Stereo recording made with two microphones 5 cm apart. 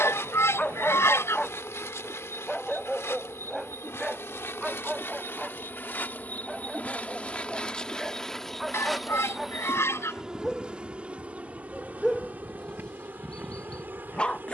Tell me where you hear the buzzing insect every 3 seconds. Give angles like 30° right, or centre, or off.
60° left, 50° left, 20° left, 20° right, 40° right.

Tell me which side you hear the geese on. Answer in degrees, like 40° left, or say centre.
60° left.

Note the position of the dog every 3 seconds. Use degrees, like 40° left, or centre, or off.
20° left, centre, centre, centre, 20° left.